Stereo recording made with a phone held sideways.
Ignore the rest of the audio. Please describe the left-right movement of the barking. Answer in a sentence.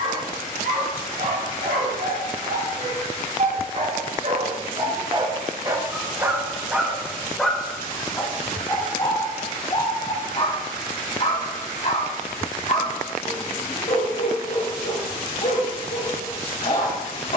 In this clip you hear the barking move to the left.